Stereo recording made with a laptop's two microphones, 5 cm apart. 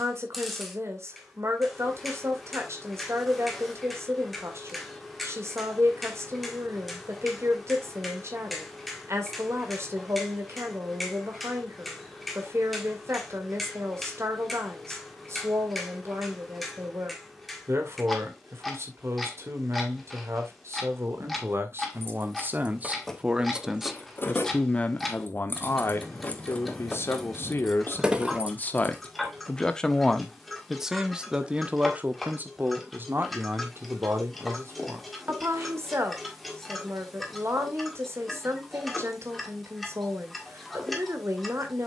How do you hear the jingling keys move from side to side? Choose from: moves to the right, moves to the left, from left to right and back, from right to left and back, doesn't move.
from right to left and back.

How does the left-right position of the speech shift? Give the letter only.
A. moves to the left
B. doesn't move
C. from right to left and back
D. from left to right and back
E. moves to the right
C.